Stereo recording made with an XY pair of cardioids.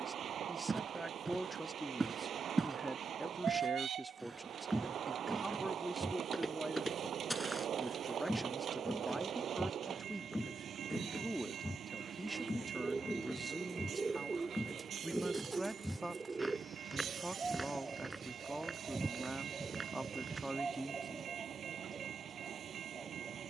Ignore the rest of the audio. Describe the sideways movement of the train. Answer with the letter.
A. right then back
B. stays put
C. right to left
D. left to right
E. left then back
B.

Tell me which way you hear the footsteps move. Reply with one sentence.
You can hear the footsteps go left and come back.